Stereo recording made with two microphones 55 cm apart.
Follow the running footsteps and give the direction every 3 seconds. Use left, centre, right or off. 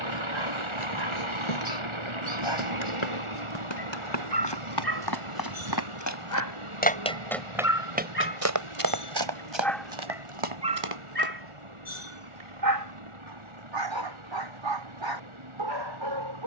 left, left, centre, right, off, off.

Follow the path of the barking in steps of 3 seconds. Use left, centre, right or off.
left, left, left, centre, right, right.